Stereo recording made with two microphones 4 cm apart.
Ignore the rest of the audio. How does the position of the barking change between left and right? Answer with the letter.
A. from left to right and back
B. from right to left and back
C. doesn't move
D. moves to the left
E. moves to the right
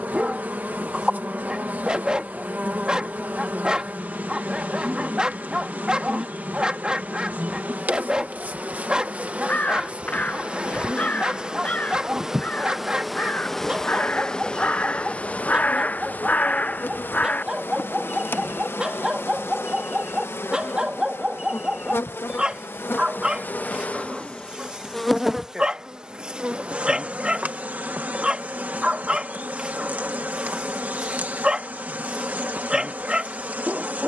C.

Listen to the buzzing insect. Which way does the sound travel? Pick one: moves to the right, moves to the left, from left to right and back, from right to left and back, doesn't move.
from right to left and back.